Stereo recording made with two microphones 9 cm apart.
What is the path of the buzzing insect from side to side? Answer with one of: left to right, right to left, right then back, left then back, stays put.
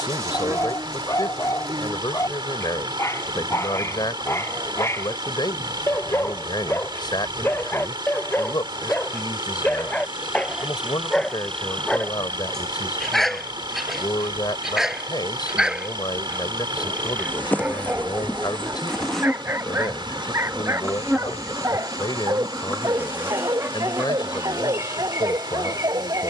left then back.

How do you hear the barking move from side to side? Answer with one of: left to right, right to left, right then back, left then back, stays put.
left to right.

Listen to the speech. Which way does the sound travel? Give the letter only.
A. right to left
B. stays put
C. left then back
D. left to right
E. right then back
B.